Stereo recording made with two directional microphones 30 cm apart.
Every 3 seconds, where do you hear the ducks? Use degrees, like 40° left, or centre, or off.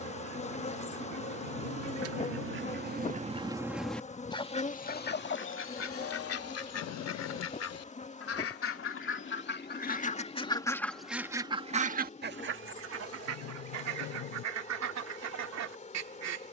60° right, 20° left, 50° left, 10° left, 50° right, 60° right.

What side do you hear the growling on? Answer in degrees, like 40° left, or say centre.
70° left.